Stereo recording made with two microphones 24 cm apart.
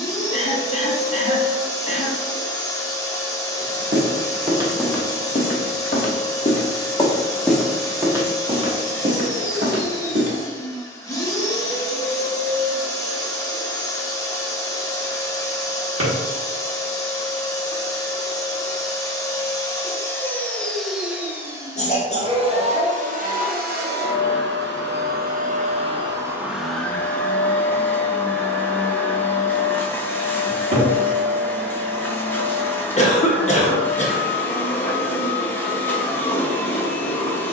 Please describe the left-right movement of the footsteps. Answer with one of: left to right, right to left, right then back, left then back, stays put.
left then back.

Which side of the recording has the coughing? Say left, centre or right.
left.